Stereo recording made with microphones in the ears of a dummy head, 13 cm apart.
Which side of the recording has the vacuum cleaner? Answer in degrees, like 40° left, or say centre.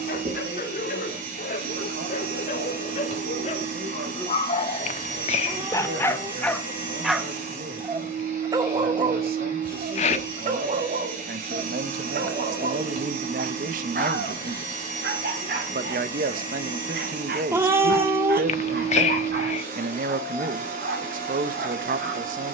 60° right.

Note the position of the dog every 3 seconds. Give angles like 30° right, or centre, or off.
60° left, 40° left, 10° right, 50° right, 60° right, 70° right, 80° right, 80° right.